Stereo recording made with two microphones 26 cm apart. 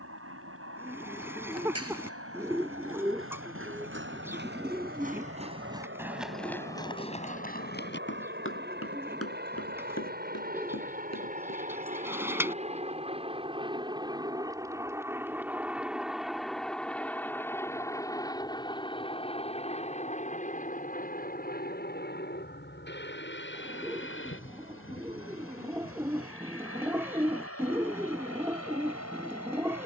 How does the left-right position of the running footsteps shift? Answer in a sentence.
In this clip you hear the running footsteps go from the right side to the left.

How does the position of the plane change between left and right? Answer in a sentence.
In this clip you hear the plane move to the left.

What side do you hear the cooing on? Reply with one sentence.
In this clip you hear the cooing in the centre.